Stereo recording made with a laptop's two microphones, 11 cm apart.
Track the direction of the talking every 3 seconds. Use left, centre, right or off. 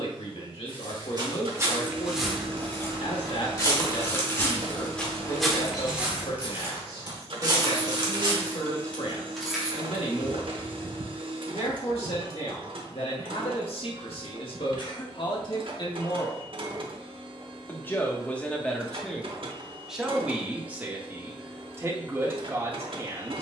left, left, left, left, left, left, centre, right.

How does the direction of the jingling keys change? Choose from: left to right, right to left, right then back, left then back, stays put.
left then back.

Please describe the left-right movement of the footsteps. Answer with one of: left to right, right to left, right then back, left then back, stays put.
left then back.